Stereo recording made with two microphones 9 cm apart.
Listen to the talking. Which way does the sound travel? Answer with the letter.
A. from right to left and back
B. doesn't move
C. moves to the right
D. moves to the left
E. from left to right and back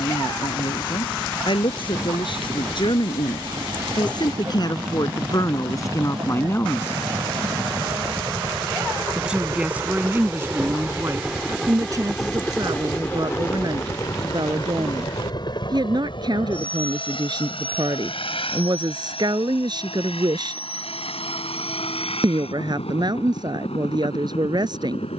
C.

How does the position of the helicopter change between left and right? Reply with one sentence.
You can hear the helicopter move from right to left.